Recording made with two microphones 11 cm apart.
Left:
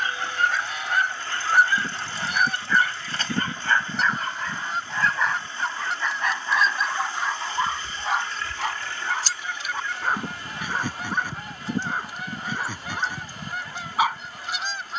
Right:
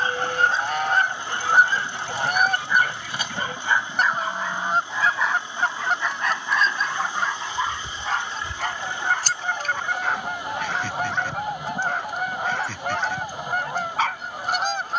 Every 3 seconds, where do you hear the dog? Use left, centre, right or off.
right, centre, centre, centre, centre.